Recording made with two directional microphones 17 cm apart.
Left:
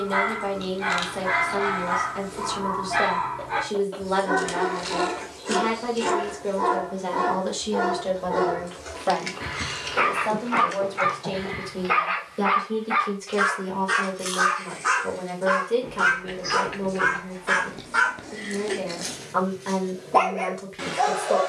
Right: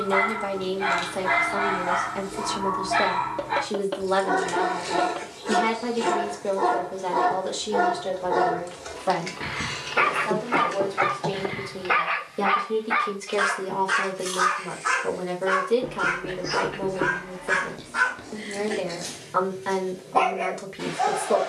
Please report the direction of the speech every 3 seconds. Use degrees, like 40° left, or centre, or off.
20° right, 20° right, centre, 10° left, 10° right, 10° right, 10° right.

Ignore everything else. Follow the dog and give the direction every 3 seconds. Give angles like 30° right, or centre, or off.
20° right, 20° right, 20° right, 20° right, 10° left, 40° left, 60° left.